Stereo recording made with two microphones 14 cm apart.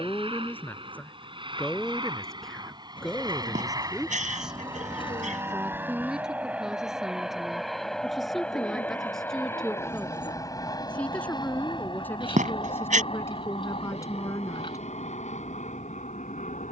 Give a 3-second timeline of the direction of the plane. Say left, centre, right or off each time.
right, right, centre, left, left, left.